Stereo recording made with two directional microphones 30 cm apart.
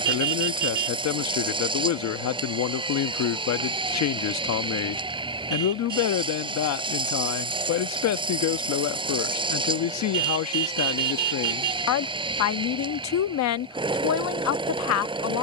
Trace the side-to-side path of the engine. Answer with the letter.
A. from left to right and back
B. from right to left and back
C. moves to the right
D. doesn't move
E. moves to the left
D.